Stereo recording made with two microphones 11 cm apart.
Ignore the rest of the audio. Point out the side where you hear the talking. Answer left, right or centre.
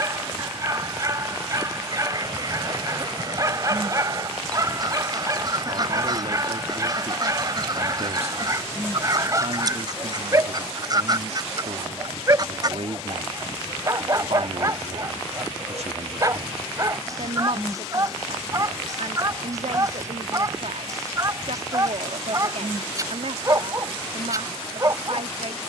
right.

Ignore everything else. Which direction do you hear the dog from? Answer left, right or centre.
right.